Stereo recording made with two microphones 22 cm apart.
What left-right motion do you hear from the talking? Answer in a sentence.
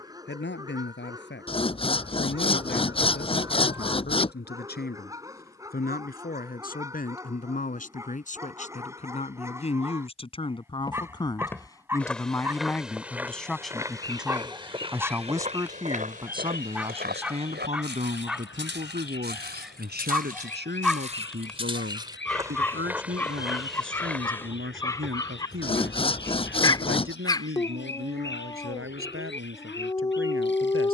In this clip you hear the talking move from left to right.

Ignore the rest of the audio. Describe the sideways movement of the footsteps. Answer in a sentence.
You can hear the footsteps go right and come back.